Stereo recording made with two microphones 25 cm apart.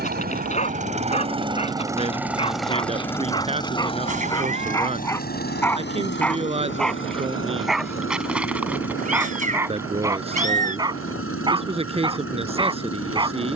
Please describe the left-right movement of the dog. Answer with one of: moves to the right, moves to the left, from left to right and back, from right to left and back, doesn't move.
moves to the right.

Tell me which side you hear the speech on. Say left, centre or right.
right.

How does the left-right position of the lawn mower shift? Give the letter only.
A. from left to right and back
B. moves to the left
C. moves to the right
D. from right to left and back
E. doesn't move
B.